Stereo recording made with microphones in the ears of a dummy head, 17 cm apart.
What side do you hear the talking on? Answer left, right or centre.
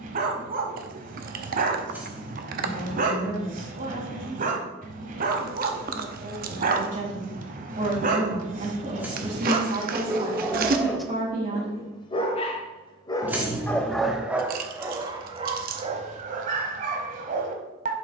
right.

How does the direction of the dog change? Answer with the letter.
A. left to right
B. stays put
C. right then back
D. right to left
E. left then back
E.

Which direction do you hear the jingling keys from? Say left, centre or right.
centre.